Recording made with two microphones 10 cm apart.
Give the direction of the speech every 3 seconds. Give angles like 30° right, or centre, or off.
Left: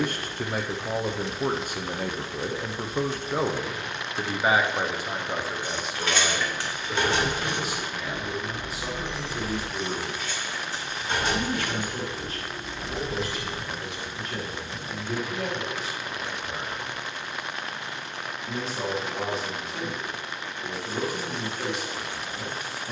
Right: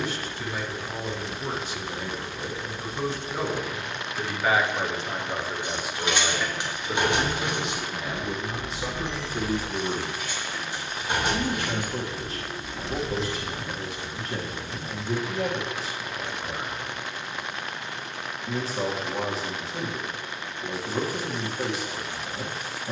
50° left, 20° left, 20° right, 30° right, 30° right, 30° right, 30° right, 30° right.